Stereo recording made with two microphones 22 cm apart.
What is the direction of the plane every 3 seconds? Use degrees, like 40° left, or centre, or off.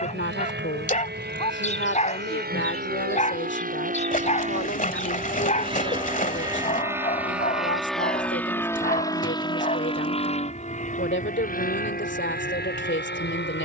60° right, 40° right, centre, 30° left, 40° left.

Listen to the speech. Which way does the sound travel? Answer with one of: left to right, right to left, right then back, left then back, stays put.
stays put.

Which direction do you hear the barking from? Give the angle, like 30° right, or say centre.
30° left.